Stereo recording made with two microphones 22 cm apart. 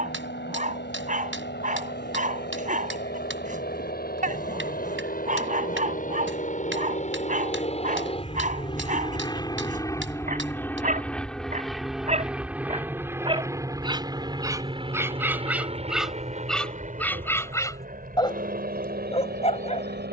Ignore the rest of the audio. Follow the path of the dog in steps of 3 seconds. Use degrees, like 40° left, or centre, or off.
40° right, 40° right, 40° right, 40° right, 20° right, centre, 30° left.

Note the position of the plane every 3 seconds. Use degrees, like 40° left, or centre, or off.
60° left, 50° left, 30° left, 10° left, 10° right, 30° right, 40° right.